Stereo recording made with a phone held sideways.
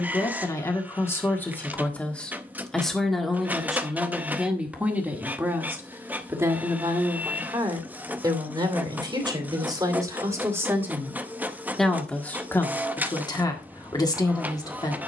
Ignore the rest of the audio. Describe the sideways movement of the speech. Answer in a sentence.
In this clip you hear the speech go right and come back.